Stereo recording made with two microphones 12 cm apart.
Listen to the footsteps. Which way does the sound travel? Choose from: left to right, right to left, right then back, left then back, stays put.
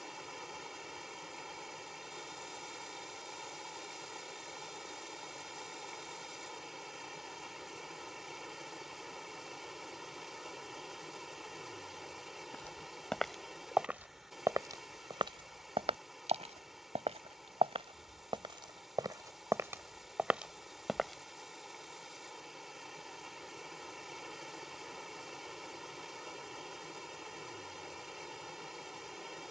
right then back.